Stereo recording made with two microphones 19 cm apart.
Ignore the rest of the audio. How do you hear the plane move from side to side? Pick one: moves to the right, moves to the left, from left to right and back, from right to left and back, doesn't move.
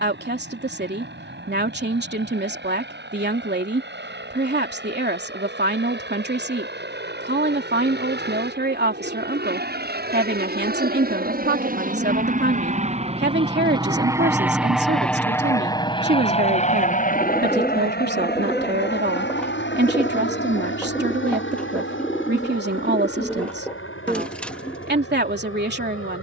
moves to the left.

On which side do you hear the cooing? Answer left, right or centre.
centre.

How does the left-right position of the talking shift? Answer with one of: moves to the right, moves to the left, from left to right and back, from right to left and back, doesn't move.
doesn't move.